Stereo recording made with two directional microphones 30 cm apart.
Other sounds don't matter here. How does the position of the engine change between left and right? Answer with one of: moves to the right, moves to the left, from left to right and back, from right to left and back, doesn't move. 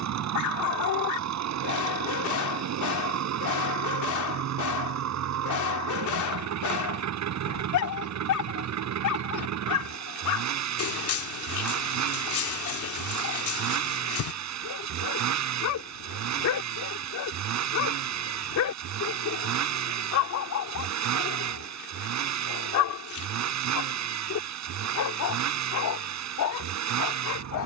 doesn't move.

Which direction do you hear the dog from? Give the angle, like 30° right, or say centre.
70° left.